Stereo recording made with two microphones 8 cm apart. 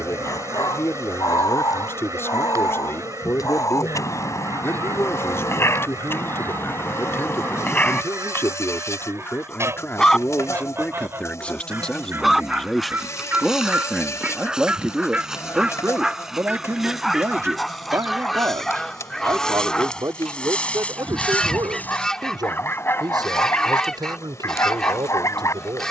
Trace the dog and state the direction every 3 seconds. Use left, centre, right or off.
left, left, left, centre, centre, centre, centre, left, left.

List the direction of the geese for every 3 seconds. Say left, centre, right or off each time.
right, right, right, right, right, centre, centre, centre, centre.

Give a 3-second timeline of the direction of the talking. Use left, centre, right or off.
left, left, left, left, centre, right, right, right, right.